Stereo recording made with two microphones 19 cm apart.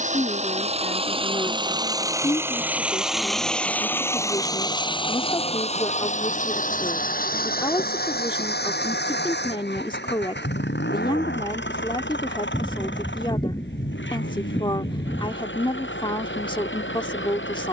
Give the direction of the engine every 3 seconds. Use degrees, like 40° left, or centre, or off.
20° right, 20° left, 50° left, 60° left, 70° left, 80° left.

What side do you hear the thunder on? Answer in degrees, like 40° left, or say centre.
20° left.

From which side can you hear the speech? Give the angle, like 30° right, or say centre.
20° left.